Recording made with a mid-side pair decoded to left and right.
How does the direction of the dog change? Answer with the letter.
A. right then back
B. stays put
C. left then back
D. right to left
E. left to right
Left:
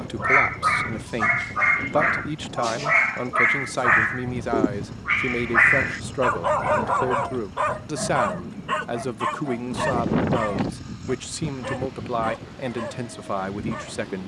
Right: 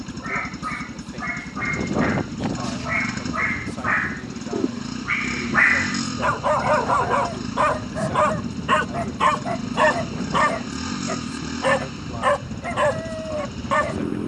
E.